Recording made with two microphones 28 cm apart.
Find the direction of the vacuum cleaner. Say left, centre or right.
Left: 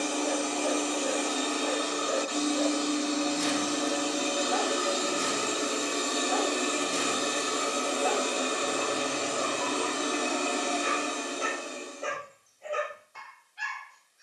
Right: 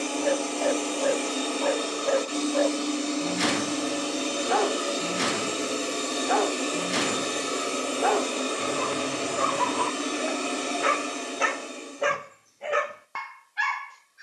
right.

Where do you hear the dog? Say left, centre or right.
right.